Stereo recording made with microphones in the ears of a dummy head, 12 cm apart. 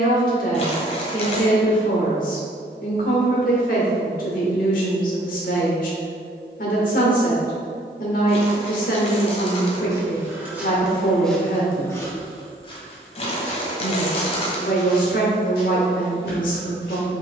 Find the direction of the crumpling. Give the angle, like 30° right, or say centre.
50° left.